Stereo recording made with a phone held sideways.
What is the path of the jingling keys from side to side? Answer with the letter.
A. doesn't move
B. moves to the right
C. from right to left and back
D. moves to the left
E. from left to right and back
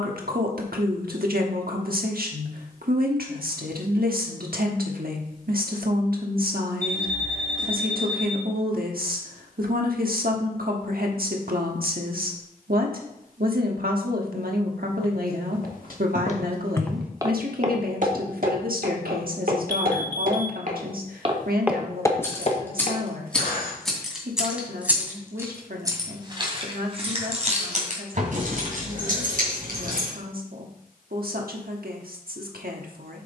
B.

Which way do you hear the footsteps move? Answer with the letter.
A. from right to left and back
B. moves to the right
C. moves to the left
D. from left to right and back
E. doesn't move
D.